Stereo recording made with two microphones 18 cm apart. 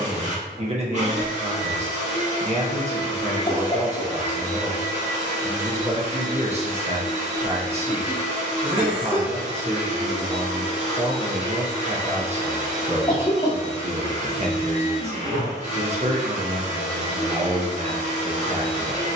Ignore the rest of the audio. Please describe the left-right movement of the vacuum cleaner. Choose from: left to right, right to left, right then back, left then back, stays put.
stays put.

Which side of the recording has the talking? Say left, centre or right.
right.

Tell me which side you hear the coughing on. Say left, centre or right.
left.